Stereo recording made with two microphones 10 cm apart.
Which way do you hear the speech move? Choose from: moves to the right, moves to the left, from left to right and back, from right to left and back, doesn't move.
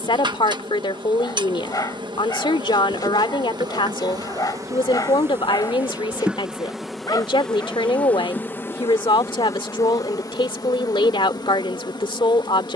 doesn't move.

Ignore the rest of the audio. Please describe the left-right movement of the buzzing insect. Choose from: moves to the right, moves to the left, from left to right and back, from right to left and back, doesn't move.
moves to the left.